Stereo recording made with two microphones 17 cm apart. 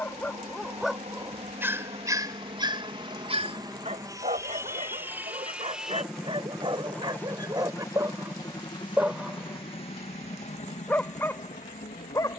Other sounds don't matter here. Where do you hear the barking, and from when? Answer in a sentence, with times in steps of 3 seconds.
You can hear the barking in the centre from 0 s, on the right from 3 s and in the centre from 9 s.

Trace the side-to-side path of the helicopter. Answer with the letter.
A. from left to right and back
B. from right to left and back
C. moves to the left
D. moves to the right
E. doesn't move
C.